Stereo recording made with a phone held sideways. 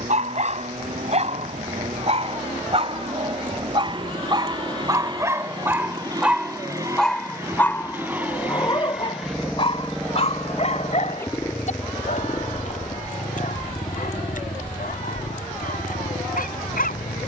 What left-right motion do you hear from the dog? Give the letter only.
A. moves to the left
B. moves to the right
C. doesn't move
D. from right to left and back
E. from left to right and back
A.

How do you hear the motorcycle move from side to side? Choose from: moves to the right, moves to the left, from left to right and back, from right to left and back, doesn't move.
moves to the left.